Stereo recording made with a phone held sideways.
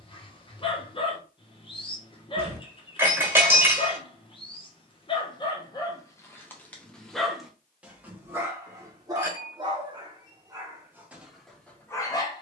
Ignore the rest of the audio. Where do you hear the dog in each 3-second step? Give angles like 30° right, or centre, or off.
30° left, 30° left, centre, 20° right.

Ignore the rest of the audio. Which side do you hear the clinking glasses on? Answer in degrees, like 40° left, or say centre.
10° right.